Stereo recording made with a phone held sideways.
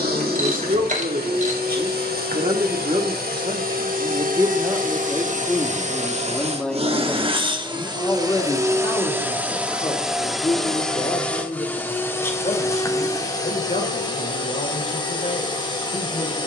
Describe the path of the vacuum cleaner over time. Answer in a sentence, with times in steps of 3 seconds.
You can hear the vacuum cleaner on the right from 0 s, in the centre from 9 s and on the left from 12 s.